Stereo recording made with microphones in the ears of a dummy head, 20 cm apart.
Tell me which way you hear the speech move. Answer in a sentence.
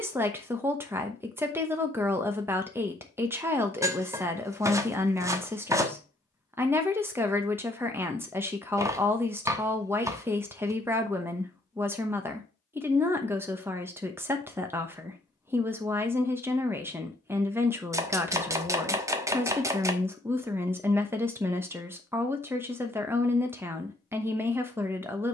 In this clip you hear the speech stay put.